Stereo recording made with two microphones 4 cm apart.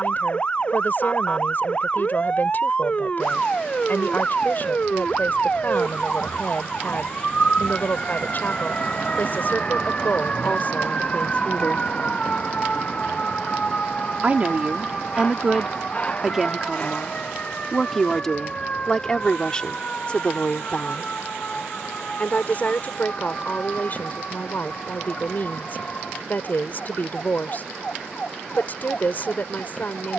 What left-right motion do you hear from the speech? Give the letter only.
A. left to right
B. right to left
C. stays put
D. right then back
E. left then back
D.